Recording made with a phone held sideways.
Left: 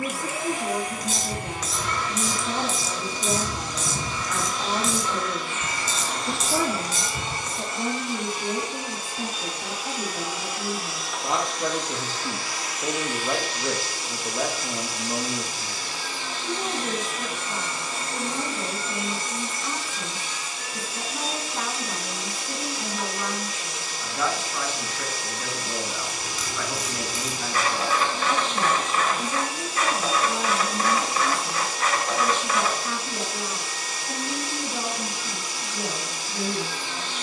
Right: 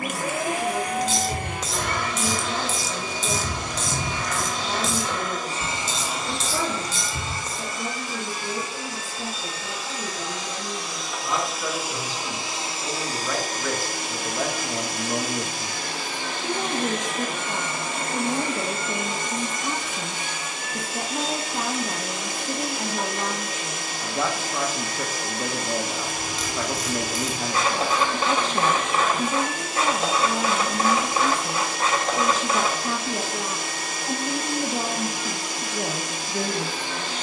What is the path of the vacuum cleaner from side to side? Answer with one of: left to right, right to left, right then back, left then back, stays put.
left then back.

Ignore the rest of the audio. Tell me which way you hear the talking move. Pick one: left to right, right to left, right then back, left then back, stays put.
left to right.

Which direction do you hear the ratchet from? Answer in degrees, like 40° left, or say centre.
30° right.